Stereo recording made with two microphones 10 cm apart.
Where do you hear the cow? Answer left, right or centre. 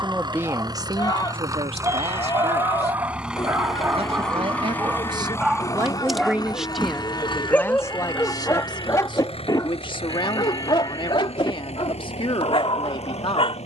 left.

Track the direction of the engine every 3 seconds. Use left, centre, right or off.
right, centre, left, left, left.